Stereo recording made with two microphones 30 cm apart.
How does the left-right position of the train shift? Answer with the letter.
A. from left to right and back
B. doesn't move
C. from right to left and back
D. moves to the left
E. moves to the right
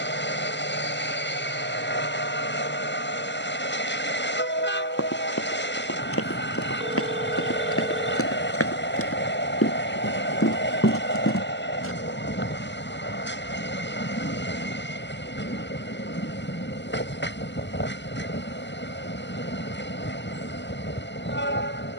B.